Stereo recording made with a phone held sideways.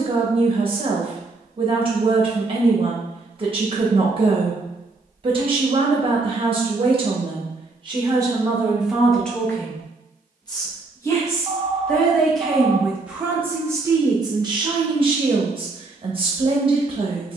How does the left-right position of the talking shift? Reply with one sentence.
In this clip you hear the talking move from right to left and back again.